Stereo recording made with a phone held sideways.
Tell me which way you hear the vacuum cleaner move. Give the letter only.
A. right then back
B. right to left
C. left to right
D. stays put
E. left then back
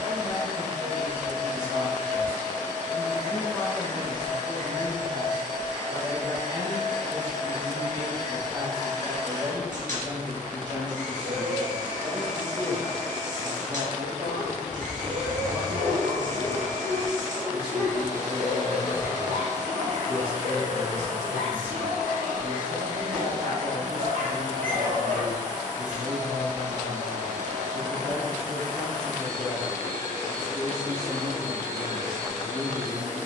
D.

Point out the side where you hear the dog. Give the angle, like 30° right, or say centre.
80° right.